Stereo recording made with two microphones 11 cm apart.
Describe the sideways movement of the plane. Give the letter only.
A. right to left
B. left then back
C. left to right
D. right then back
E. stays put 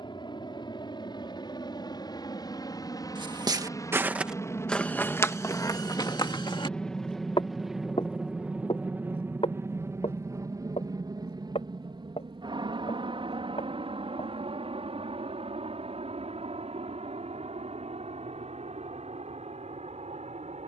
C.